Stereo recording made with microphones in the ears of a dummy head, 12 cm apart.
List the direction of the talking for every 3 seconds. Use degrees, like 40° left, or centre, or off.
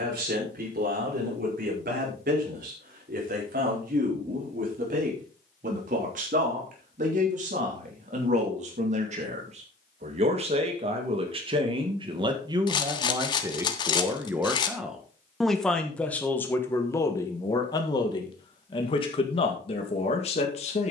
70° right, 70° right, 60° right, 50° right, 20° right, 20° left, 40° left.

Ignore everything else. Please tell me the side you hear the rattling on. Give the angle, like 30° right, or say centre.
30° left.